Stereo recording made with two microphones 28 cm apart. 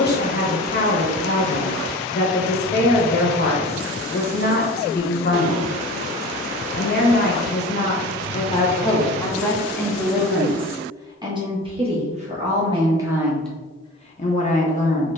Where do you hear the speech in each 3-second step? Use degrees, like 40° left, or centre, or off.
40° left, 40° left, 30° left, 10° right, centre.